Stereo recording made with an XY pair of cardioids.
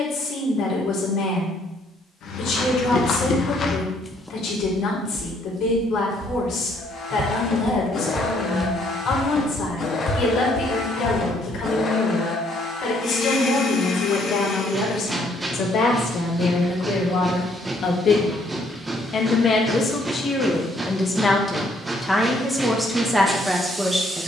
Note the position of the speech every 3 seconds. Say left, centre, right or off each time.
left, left, left, left, left, left, left, centre.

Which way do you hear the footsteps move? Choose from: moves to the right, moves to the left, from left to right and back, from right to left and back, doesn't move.
from left to right and back.